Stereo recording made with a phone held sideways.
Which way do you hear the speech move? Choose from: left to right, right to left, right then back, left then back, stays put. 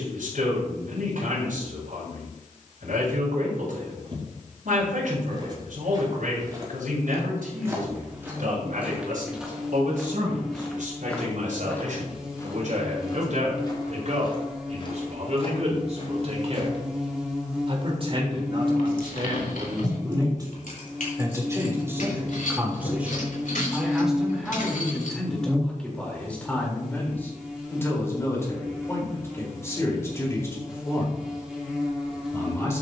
right to left.